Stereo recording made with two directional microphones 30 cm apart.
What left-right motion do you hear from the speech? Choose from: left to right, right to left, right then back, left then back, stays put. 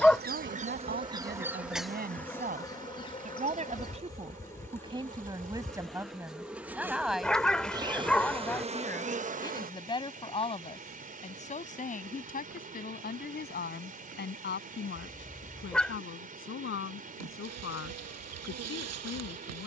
right to left.